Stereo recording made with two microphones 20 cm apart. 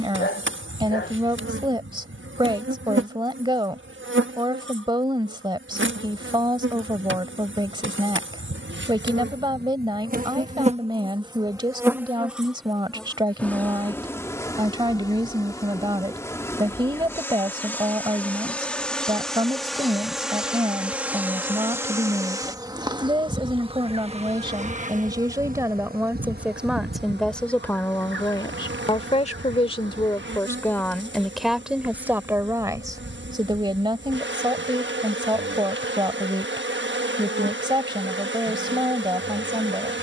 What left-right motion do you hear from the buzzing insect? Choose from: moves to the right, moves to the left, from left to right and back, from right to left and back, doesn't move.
from right to left and back.